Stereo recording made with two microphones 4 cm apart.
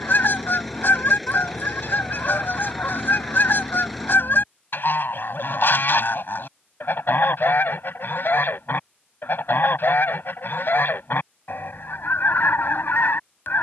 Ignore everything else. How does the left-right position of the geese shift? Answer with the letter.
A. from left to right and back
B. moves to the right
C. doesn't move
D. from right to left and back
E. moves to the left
C.